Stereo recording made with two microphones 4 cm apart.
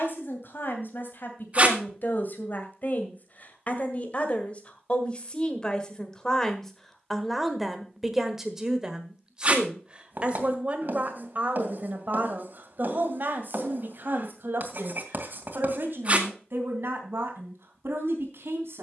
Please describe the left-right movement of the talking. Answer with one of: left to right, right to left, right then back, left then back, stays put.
left to right.